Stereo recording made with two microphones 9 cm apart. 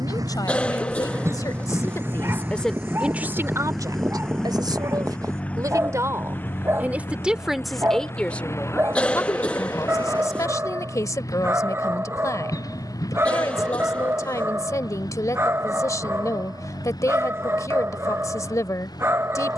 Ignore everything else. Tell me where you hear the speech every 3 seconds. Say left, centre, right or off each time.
left, right, centre, left, left, left, left.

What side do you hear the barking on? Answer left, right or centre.
right.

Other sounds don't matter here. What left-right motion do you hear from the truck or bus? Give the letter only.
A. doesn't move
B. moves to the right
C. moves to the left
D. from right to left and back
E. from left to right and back
C.